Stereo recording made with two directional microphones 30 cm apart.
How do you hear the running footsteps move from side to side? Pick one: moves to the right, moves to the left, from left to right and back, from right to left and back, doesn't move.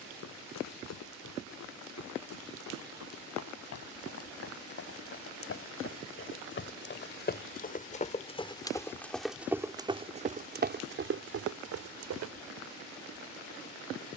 moves to the right.